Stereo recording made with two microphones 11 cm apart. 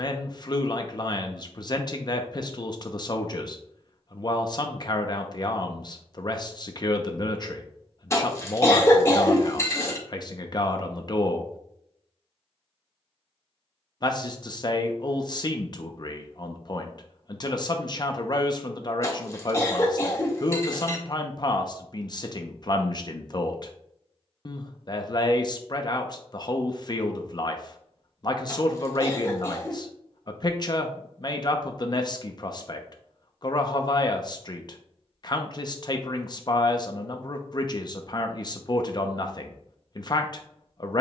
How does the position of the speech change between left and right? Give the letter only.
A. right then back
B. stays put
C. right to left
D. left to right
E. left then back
B.